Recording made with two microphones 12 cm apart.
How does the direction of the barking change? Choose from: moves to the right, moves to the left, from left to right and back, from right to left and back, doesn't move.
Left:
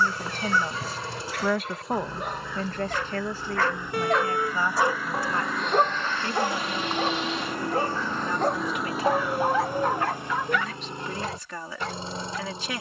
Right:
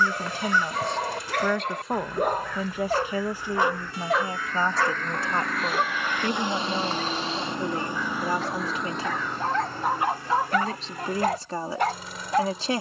from right to left and back.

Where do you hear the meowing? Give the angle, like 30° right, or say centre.
60° left.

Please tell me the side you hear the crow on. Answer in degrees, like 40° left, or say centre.
10° left.